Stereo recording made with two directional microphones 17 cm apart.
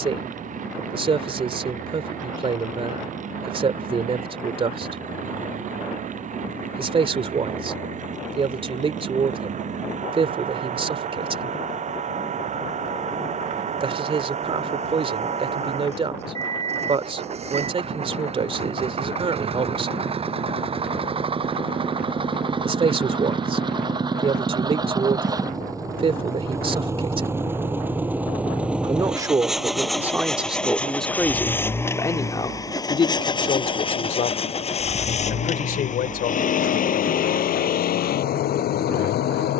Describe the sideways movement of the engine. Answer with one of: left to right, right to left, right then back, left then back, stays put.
right to left.